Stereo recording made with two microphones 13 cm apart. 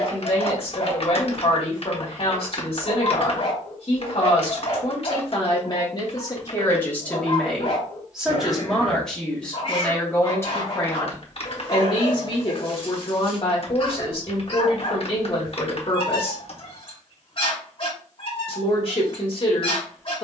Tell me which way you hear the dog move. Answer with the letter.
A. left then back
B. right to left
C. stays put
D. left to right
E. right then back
C.